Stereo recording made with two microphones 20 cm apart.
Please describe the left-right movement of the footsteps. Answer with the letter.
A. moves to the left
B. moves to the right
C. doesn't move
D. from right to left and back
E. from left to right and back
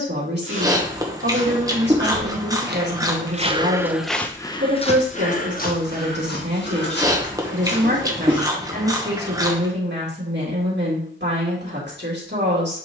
A.